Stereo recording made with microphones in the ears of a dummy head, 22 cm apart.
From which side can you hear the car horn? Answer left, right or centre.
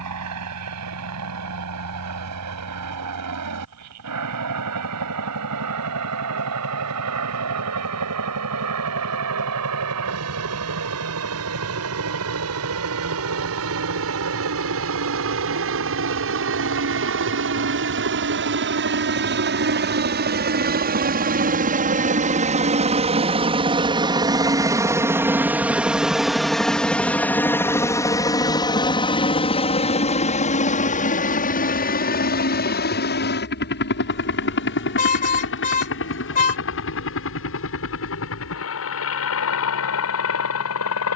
left.